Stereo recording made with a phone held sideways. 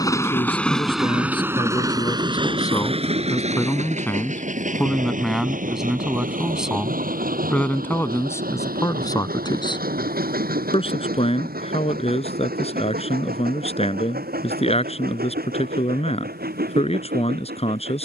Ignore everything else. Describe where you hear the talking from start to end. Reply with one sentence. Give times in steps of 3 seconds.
In this clip you hear the talking on the left from 0 s, in the centre from 3 s and on the left from 9 s.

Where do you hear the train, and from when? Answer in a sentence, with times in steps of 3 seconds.
In this clip you hear the train in the centre from 0 s and on the right from 3 s.